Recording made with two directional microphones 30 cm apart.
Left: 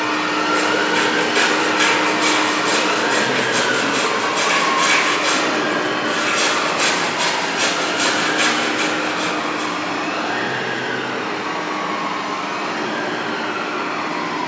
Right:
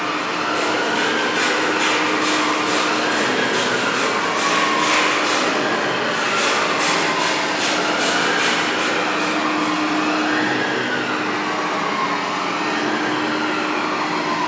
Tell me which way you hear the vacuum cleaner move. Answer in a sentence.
In this clip you hear the vacuum cleaner move from left to right.